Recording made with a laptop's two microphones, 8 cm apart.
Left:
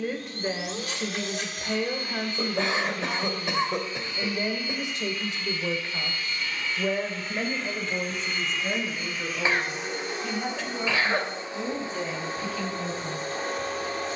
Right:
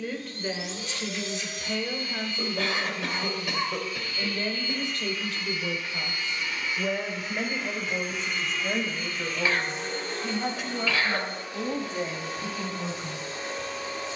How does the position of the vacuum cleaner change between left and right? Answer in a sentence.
In this clip you hear the vacuum cleaner move from left to right and back again.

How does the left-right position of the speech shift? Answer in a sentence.
You can hear the speech travel towards the right.